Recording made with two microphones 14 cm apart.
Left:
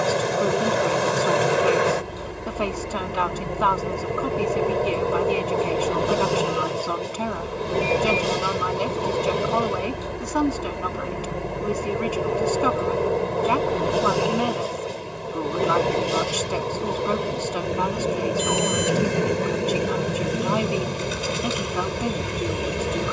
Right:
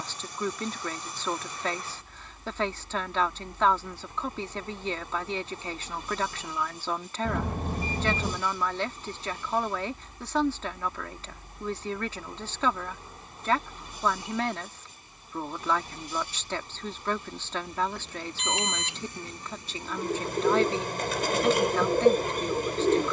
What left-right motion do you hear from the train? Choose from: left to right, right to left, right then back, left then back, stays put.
stays put.